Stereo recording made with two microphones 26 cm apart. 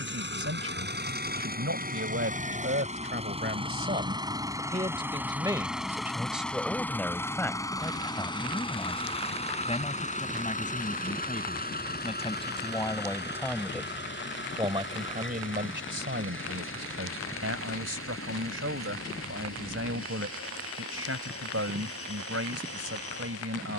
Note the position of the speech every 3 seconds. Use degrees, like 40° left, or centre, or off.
50° right, 30° right, 10° left, 30° left, 10° left, 50° right, 60° right, 60° right.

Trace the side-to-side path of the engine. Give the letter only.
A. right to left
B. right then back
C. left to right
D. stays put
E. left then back
A.